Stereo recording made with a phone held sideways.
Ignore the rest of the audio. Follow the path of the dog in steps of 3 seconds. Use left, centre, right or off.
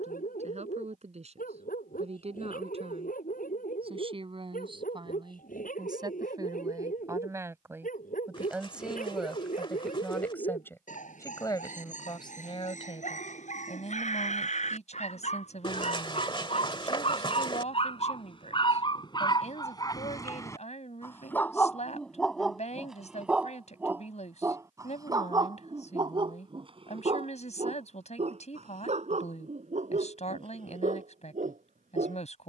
left, left, left, left, left, left, left, centre, right, right, right.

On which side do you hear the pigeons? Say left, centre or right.
left.